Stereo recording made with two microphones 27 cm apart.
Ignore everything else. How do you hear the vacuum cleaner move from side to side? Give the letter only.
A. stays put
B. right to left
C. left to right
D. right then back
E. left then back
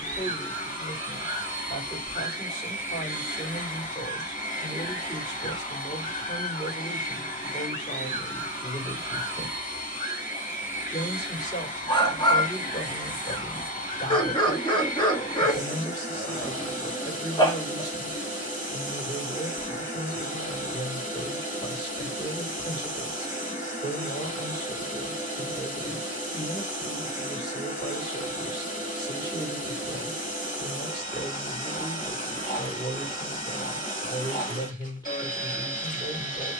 A.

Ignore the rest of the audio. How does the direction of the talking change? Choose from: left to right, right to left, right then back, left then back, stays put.
stays put.